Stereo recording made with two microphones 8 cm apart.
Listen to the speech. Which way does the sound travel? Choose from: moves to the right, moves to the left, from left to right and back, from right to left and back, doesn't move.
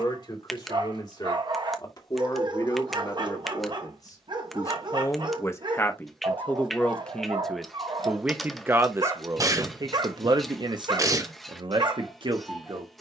moves to the right.